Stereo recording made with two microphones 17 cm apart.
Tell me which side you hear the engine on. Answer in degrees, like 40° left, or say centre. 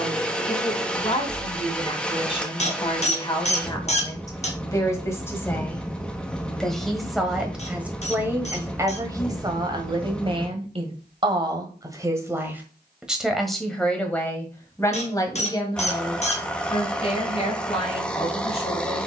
10° left.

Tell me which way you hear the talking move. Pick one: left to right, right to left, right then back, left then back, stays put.
right then back.